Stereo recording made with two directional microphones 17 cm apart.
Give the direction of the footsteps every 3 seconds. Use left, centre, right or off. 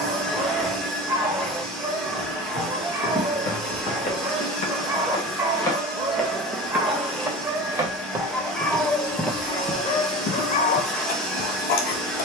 left, left, centre, left.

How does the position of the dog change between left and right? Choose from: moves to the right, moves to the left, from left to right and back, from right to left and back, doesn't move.
moves to the left.